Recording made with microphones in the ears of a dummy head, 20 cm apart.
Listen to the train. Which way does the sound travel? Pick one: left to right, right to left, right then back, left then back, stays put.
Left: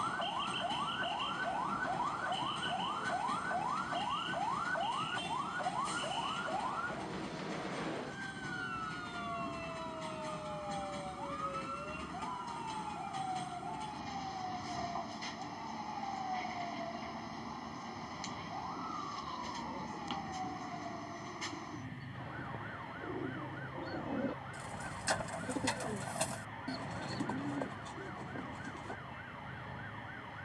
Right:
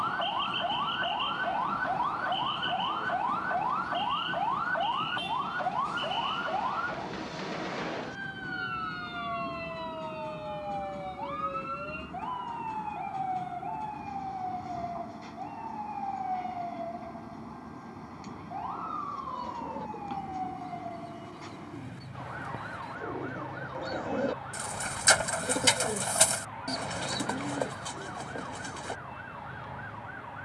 stays put.